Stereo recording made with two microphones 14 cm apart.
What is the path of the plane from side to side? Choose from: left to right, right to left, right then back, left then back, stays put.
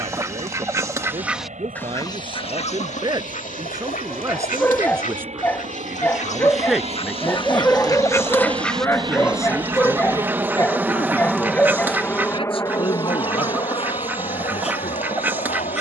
right to left.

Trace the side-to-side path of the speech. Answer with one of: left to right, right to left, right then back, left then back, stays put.
right to left.